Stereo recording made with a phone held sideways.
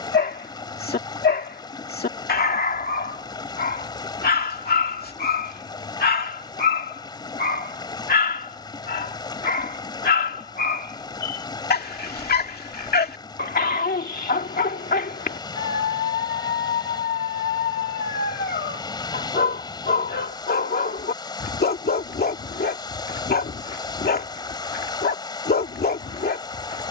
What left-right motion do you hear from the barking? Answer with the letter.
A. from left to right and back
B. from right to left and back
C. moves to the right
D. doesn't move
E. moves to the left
D.